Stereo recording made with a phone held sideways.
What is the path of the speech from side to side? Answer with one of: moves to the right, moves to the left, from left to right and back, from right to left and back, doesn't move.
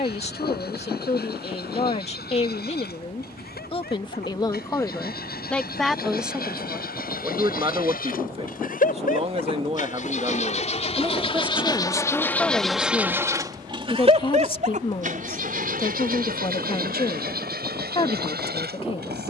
from left to right and back.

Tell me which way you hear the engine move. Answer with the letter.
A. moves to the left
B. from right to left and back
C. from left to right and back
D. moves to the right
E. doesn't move
D.